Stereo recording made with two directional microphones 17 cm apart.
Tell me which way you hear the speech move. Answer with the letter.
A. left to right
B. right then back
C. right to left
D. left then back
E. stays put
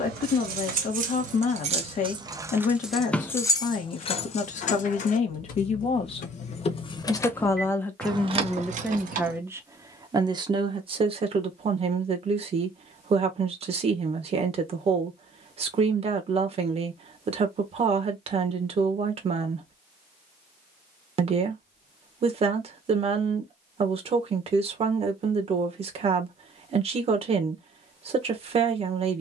A.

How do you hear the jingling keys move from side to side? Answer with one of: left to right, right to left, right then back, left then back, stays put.
left then back.